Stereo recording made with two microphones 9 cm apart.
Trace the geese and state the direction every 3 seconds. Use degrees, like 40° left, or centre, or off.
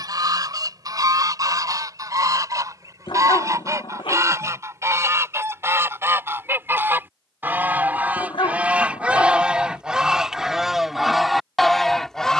40° right, 30° right, 20° right, 10° right.